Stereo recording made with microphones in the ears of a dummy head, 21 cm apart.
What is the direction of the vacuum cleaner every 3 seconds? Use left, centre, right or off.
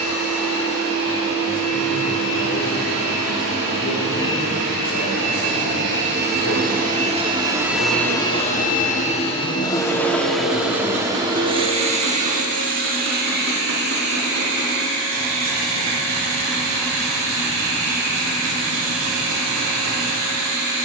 right, right, centre, centre, right, right, right.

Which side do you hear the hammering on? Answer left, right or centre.
right.